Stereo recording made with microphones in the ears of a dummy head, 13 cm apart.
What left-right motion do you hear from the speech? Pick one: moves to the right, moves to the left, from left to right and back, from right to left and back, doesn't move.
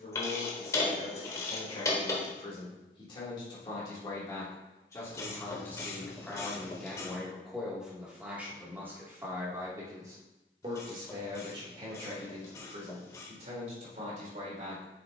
moves to the right.